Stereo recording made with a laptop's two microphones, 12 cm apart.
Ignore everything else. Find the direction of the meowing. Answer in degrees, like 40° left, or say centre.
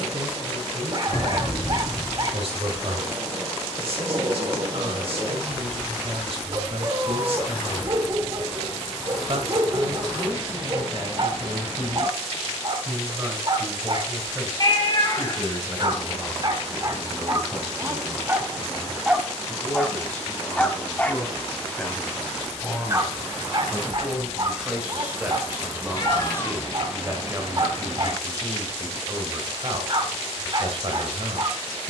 40° left.